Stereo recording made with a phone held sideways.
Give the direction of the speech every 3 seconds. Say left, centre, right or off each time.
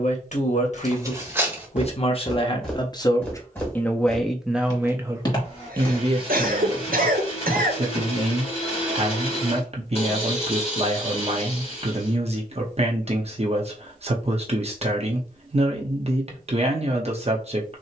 left, centre, right, right, right, right.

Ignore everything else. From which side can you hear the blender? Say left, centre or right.
left.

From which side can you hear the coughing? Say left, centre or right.
right.